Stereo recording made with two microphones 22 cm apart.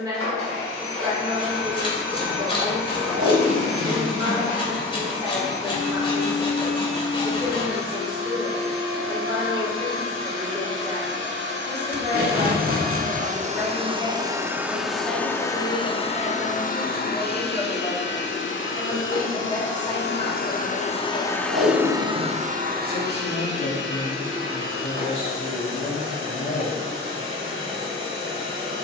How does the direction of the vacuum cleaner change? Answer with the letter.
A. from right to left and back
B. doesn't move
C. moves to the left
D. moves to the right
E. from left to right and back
A.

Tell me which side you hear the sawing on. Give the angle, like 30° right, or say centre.
20° left.